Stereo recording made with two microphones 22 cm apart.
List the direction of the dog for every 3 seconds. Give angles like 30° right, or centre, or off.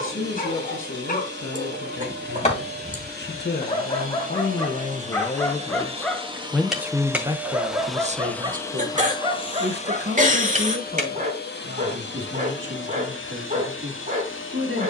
40° left, 20° left, 10° right, 30° right, 40° right.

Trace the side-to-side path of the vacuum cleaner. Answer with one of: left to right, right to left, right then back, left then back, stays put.
right to left.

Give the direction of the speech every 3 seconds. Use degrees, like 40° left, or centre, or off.
60° left, 40° left, 20° right, 60° right, 70° right.